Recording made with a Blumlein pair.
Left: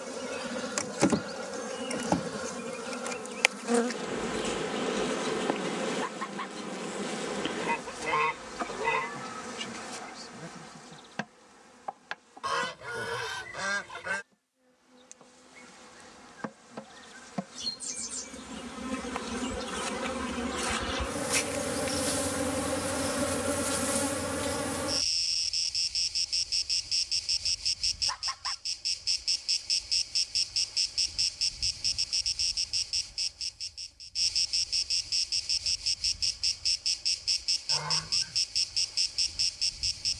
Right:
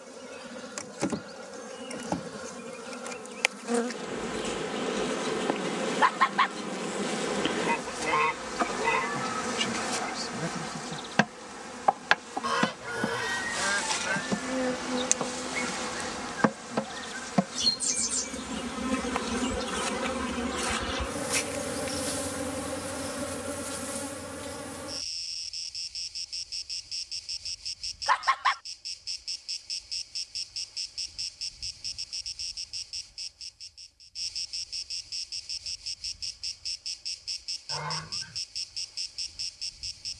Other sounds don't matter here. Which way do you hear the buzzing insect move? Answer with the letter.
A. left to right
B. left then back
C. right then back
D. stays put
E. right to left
C.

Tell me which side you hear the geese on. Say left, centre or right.
centre.